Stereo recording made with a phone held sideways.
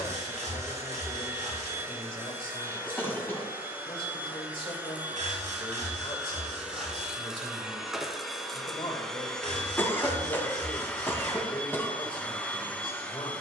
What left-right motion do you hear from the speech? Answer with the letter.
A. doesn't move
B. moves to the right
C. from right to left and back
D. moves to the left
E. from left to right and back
A.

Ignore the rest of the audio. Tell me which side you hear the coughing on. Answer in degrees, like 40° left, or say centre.
20° left.